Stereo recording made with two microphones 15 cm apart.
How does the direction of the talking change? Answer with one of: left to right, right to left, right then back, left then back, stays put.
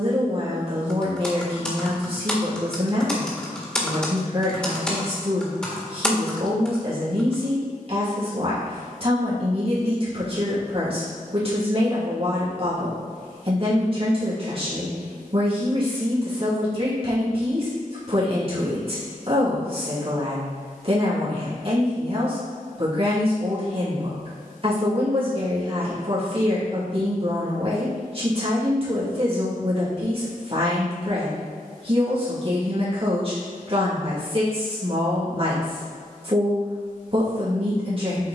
stays put.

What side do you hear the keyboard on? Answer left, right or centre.
centre.